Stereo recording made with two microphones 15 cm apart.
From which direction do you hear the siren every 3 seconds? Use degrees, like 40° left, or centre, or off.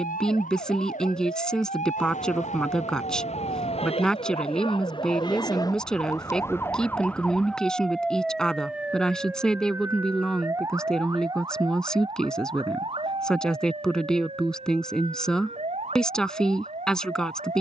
60° left, 40° left, 10° left, 20° right, 40° right, 50° right.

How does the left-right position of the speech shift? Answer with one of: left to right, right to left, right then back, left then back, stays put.
stays put.